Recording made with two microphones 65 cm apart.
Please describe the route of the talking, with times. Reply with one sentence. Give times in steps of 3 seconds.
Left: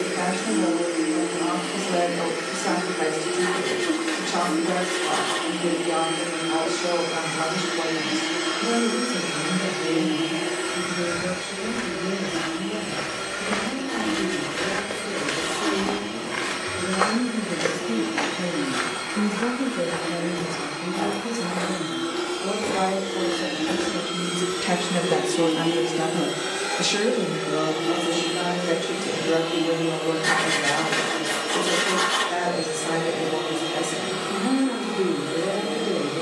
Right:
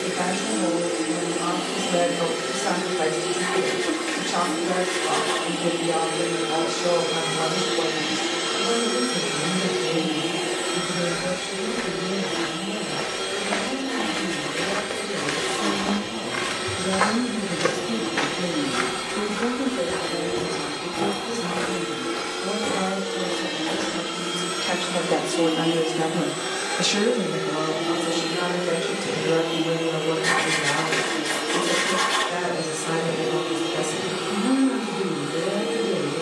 In this clip you hear the talking on the right from 0 s, on the left from 18 s and on the right from 27 s.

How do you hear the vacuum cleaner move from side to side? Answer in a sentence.
You can hear the vacuum cleaner move from right to left.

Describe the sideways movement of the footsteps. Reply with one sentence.
You can hear the footsteps move from left to right and back again.